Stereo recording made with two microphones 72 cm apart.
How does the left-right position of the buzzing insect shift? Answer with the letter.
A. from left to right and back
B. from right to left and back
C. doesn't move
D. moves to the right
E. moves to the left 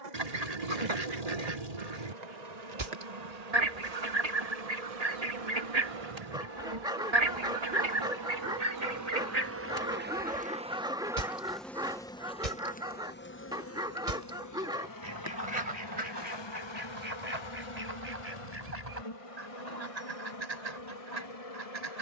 E.